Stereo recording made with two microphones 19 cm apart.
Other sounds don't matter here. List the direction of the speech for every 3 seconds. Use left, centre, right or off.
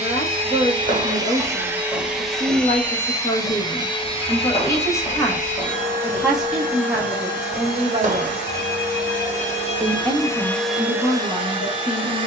left, left, centre, left.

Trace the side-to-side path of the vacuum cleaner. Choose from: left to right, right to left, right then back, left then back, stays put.
left then back.